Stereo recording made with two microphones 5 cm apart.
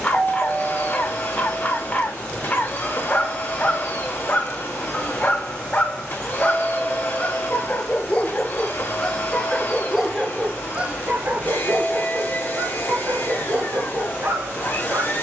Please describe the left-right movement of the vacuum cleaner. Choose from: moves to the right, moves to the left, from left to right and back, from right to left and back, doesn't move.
doesn't move.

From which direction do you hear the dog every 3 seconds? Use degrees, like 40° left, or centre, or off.
30° left, 30° left, 30° left, 20° right, 60° right.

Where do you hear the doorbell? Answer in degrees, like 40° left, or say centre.
30° left.